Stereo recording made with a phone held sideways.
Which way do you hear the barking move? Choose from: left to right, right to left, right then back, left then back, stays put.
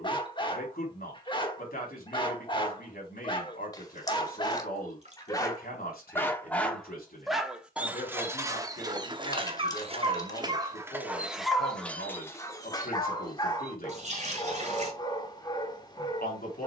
right then back.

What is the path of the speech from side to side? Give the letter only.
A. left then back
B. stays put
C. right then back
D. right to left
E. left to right
B.